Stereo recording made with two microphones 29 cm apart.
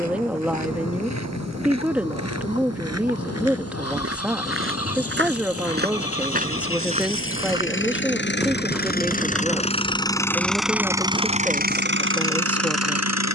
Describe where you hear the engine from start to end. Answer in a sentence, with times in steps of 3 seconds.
You can hear the engine on the left from 0 s, in the centre from 9 s and on the right from 12 s.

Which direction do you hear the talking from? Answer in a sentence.
You can hear the talking in the centre.